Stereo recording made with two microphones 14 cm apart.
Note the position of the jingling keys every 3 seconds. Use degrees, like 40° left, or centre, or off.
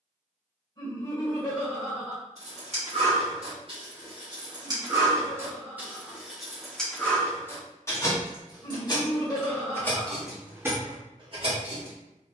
50° right, 30° right, 10° left, 10° right.